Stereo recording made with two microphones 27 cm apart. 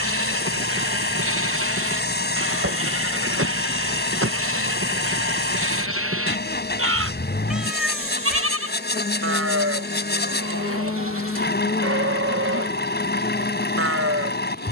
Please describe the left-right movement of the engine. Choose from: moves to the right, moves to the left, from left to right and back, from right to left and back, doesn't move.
doesn't move.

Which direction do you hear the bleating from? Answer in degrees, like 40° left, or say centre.
50° right.